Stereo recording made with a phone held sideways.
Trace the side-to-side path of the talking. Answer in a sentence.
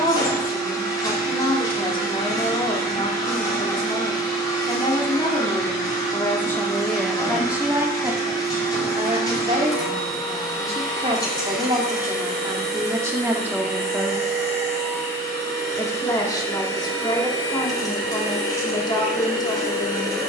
In this clip you hear the talking move from left to right and back again.